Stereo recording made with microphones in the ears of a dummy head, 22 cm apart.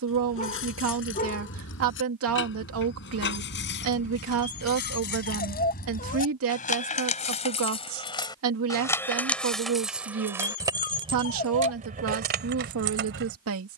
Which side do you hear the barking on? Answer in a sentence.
You can hear the barking on the left.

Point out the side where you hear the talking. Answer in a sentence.
In this clip you hear the talking on the right.